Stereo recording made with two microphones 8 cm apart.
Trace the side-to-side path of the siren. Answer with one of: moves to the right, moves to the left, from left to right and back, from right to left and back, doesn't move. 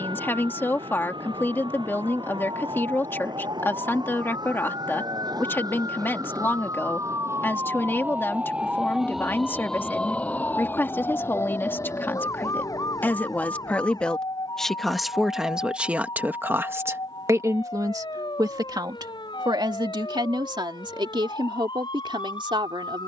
moves to the left.